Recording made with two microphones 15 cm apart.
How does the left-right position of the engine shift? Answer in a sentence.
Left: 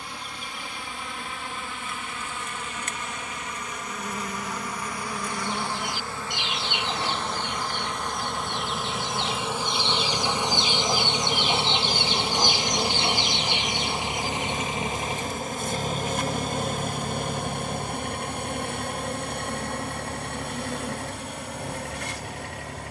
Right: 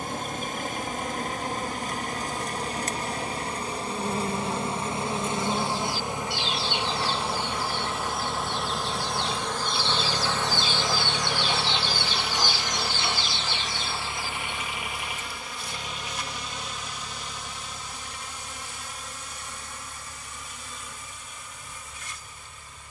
You can hear the engine travel towards the left.